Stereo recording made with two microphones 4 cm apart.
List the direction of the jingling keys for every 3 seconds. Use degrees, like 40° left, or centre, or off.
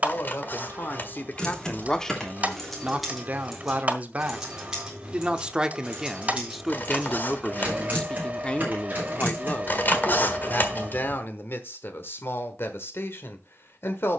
10° left, 10° right, 30° right, 40° right, off.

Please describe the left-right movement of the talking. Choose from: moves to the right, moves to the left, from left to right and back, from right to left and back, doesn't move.
from left to right and back.